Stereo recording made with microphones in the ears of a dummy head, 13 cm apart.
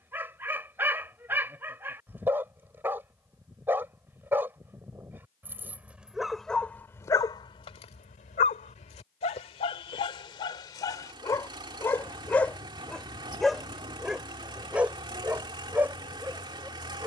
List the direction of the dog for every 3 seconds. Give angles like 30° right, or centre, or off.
10° right, 10° right, 30° left, 30° left, centre, 10° right.